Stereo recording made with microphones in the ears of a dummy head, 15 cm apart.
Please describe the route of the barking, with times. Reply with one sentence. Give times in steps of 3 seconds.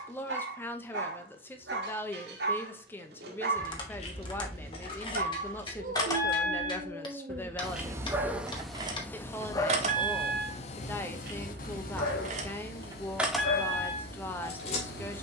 You can hear the barking on the right from 0 s and on the left from 9 s.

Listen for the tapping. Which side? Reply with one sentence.
You can hear the tapping on the left.